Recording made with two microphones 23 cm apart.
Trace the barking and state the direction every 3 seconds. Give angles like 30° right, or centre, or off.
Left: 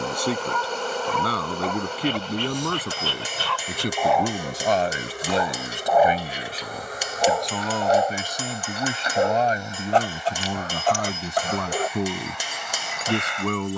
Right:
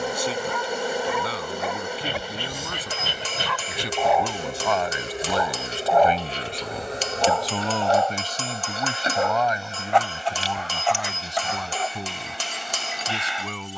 10° right, centre, 20° left, 40° left, 60° left.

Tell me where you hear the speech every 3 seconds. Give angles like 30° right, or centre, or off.
70° left, 40° left, 10° left, 50° left, 60° left.